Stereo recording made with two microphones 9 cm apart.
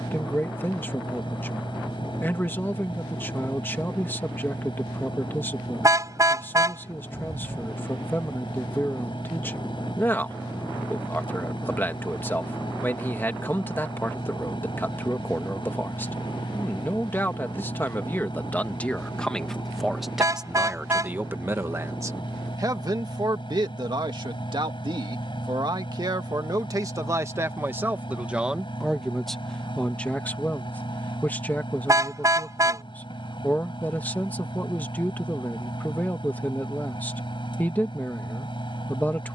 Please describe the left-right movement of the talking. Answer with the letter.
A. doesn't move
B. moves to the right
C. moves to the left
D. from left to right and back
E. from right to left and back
D.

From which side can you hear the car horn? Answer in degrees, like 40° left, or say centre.
40° right.